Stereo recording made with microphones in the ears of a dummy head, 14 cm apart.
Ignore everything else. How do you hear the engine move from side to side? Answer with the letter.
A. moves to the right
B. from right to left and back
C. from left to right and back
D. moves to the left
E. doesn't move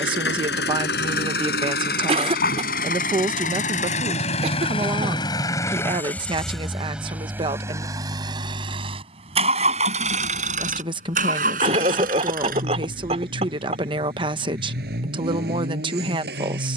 A.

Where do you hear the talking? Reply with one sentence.
You can hear the talking on the right.